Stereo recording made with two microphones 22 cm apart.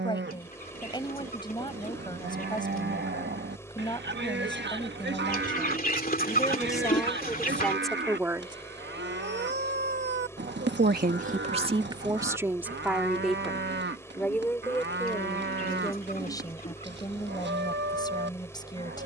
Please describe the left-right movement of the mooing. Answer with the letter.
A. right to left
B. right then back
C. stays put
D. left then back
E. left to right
C.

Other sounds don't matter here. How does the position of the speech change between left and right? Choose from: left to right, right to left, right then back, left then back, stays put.
right then back.